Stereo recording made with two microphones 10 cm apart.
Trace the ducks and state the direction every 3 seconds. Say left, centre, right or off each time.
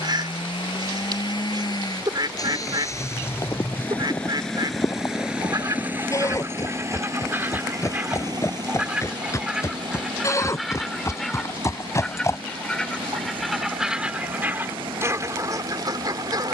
right, right, right, centre, centre, right.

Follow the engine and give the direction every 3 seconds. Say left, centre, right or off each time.
left, centre, right, right, right, right.